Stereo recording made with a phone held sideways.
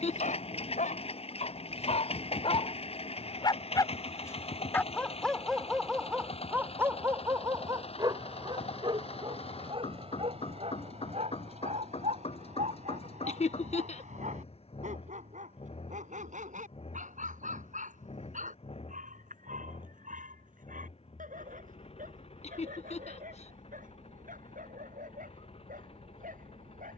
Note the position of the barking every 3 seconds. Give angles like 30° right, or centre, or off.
50° left, 10° left, 20° right, 40° right, 50° right, 60° right, 60° right, 70° right, 70° right.